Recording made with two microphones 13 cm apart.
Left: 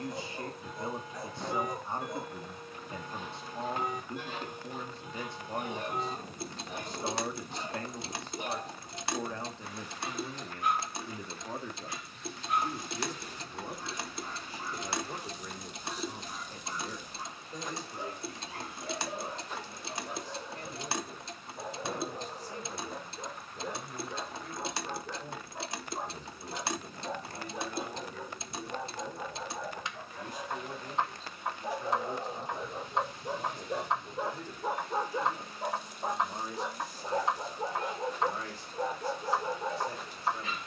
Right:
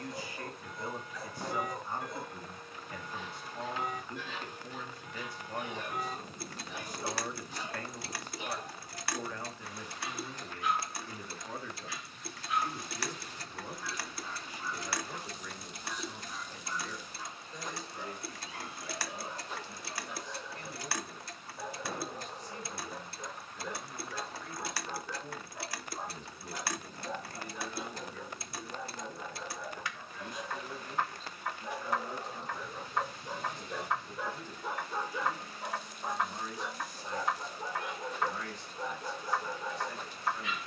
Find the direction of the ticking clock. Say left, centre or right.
left.